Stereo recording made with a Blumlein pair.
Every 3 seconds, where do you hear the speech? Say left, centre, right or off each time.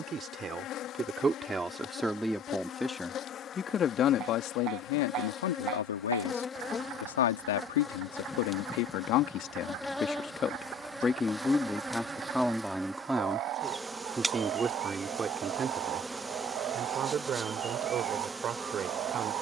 centre, left, left, left, centre, right, right.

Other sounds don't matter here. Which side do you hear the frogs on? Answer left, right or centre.
right.